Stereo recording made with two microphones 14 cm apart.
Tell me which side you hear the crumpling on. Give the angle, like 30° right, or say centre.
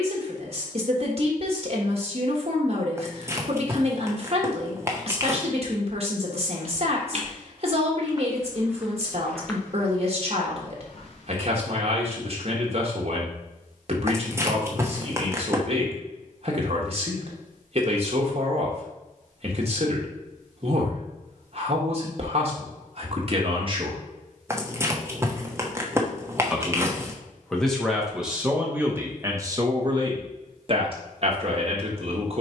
20° right.